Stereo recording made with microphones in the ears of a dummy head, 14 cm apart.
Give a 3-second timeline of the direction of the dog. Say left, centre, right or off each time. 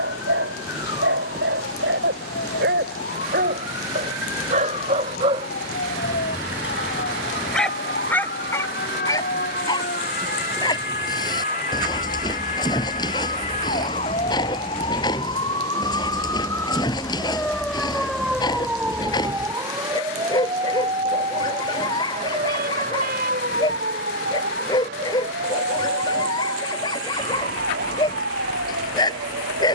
right, right, centre, left, left, left, left, left, left, left.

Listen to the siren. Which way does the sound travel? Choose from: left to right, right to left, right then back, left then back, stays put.
left to right.